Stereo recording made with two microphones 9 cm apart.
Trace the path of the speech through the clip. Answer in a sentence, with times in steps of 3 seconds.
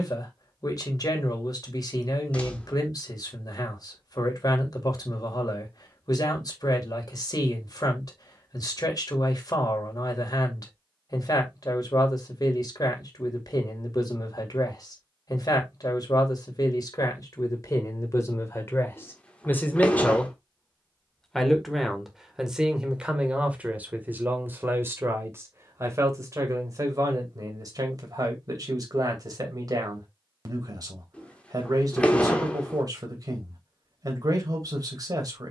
In this clip you hear the speech on the left from 0 s, in the centre from 21 s and on the right from 24 s.